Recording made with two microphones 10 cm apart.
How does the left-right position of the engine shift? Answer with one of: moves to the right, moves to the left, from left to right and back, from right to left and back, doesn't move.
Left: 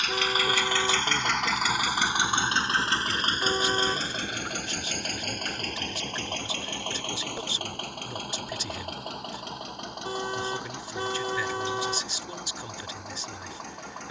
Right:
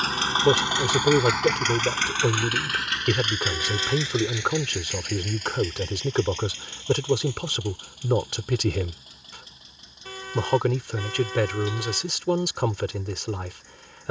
moves to the left.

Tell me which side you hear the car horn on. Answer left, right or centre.
left.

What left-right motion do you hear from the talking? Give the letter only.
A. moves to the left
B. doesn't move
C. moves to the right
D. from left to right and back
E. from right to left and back
B.